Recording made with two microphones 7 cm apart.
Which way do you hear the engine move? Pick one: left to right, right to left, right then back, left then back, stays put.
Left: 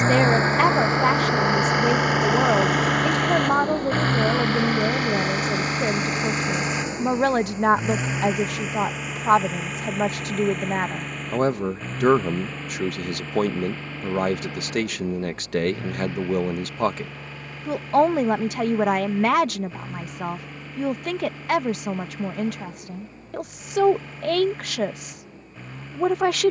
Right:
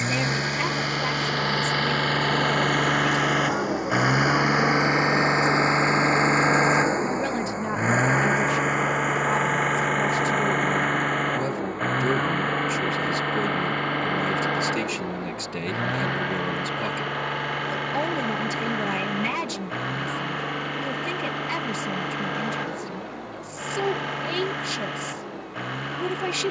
left to right.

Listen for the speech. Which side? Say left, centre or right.
left.